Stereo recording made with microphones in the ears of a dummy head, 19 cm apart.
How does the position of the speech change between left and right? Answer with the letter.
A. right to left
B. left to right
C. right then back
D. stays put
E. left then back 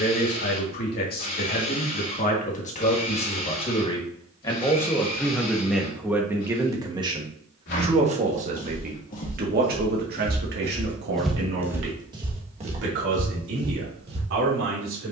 B.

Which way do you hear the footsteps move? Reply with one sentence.
In this clip you hear the footsteps travel towards the right.